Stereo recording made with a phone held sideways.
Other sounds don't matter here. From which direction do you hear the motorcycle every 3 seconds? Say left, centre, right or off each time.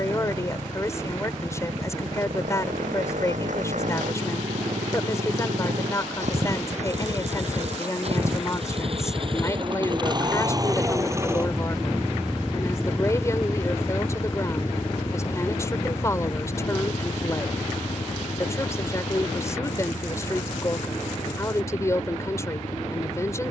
right, right, right, right, centre, left, left, left.